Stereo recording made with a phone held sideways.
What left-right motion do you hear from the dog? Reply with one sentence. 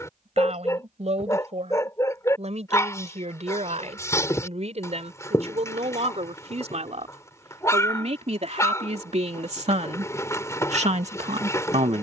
You can hear the dog stay in one place.